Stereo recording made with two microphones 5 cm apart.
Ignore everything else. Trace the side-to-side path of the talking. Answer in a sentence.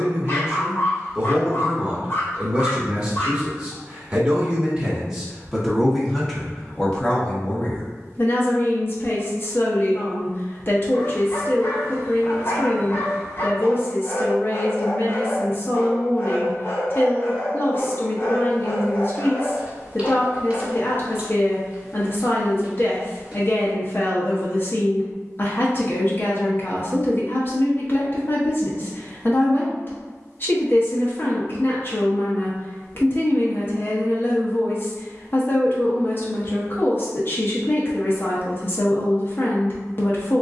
You can hear the talking move from right to left.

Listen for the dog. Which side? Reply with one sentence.
You can hear the dog on the left.